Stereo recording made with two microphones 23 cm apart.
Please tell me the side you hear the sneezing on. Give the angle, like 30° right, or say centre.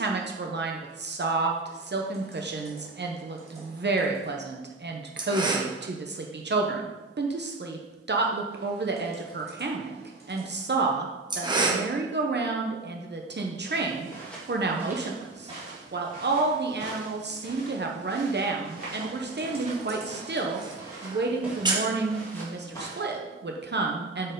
20° right.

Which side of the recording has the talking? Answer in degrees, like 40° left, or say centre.
50° right.